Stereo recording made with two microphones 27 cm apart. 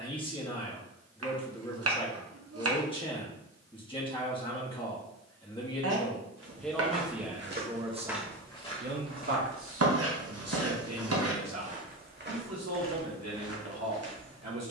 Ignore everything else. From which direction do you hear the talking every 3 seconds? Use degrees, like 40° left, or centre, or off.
20° left, 20° left, 10° right, 60° right, 80° right.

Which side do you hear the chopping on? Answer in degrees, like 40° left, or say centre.
60° right.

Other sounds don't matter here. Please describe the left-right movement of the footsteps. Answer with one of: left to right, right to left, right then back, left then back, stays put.
left then back.